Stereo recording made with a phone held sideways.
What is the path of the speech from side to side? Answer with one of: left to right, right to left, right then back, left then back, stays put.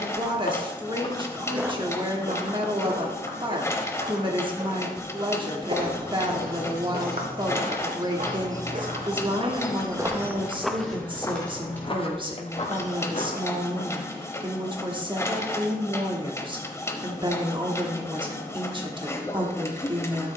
stays put.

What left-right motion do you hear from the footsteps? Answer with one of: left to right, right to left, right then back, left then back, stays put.
right then back.